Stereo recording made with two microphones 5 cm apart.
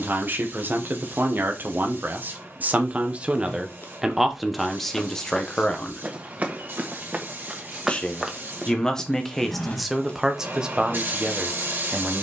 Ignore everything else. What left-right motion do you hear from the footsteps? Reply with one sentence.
In this clip you hear the footsteps go right and come back.